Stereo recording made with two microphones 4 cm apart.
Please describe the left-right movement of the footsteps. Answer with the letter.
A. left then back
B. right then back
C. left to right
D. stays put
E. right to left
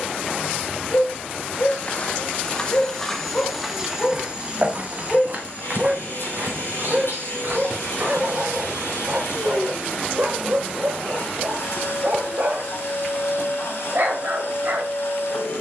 C.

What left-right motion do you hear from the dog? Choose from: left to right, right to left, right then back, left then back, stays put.
left to right.